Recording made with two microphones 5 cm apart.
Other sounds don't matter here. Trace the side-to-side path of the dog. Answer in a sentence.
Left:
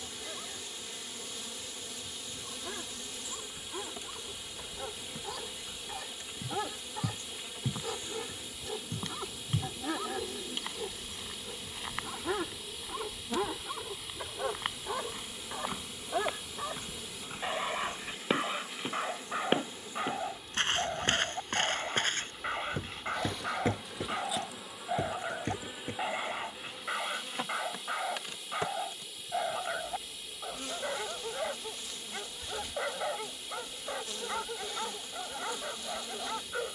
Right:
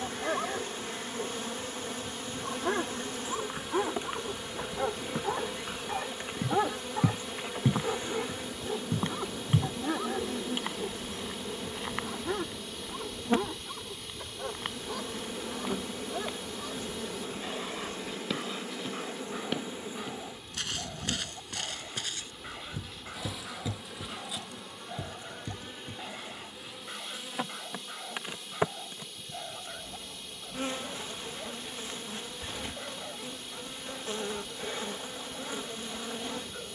You can hear the dog travel towards the left.